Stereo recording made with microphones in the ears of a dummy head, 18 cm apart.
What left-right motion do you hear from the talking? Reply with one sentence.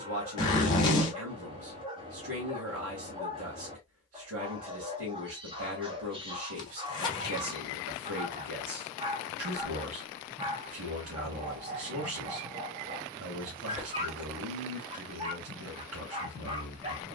In this clip you hear the talking stay in one place.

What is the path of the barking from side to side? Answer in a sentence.
In this clip you hear the barking stay in one place.